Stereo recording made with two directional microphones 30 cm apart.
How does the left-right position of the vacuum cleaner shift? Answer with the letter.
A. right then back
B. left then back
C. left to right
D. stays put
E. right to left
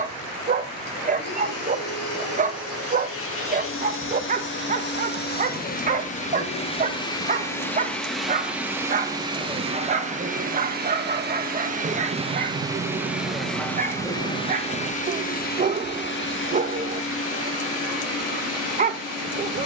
A.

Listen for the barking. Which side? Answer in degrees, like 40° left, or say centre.
30° right.